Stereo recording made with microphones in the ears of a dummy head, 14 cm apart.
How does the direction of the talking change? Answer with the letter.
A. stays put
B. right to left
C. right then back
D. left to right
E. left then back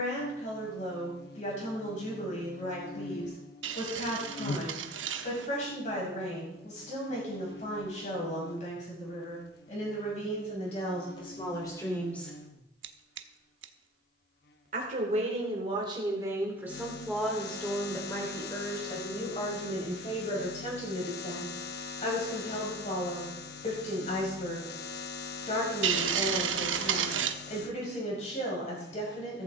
C.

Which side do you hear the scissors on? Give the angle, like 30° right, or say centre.
80° right.